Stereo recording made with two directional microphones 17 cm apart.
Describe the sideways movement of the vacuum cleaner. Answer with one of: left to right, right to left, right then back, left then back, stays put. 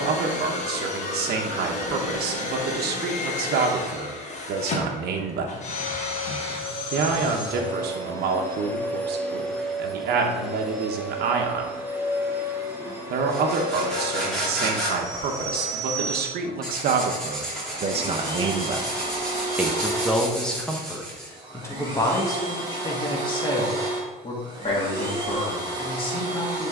left to right.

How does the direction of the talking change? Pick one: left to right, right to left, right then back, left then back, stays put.
right to left.